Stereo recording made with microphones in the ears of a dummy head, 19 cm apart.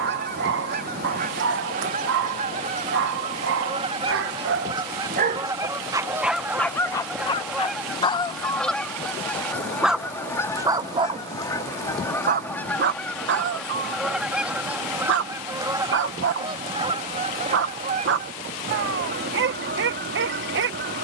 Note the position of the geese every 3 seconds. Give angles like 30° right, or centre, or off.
40° right, 20° right, centre, 10° left, centre, 20° right, 50° right.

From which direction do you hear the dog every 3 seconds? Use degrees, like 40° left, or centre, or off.
50° right, 50° right, 10° left, 10° right, 50° right, 50° right, 50° right.